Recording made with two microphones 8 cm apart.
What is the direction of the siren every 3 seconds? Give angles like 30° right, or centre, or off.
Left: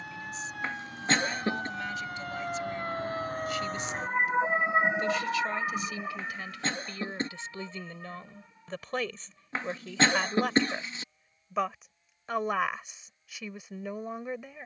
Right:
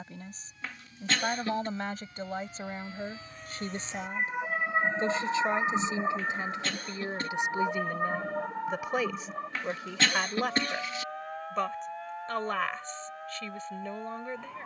70° left, 20° left, 50° right, 70° right, 80° right.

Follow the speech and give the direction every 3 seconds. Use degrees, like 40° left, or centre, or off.
40° right, 30° right, 20° right, centre, 10° left.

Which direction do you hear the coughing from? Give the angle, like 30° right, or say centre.
30° left.